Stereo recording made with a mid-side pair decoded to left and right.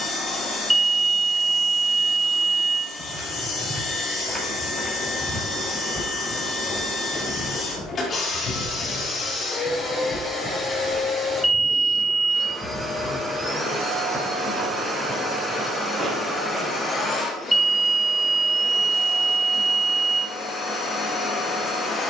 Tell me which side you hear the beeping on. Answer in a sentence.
You can hear the beeping in the centre.